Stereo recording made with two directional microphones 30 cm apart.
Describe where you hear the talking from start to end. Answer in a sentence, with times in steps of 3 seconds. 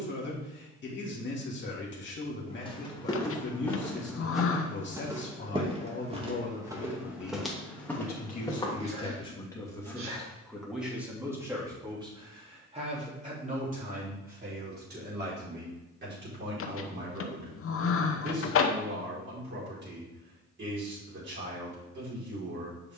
In this clip you hear the talking on the left from 0 s, in the centre from 9 s and on the right from 12 s.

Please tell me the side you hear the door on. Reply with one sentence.
In this clip you hear the door on the left.